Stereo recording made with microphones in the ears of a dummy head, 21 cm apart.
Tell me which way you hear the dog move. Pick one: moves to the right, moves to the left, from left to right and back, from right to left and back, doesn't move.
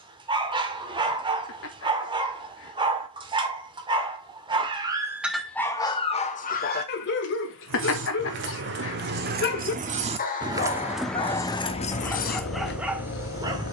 from right to left and back.